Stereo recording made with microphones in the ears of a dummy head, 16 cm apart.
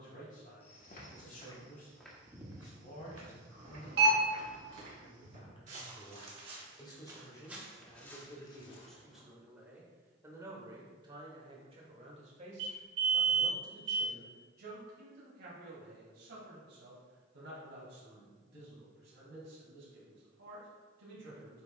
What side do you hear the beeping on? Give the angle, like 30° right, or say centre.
70° right.